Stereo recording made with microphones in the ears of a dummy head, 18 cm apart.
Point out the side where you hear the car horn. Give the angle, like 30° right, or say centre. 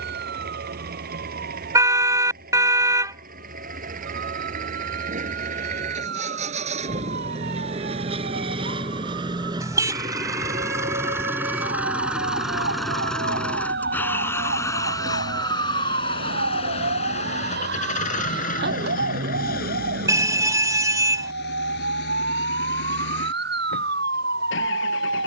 20° right.